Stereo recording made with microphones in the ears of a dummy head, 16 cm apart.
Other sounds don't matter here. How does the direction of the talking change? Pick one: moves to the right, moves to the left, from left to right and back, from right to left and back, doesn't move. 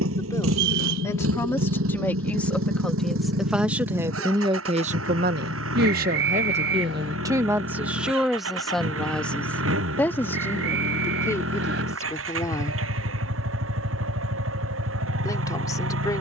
from left to right and back.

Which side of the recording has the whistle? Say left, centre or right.
right.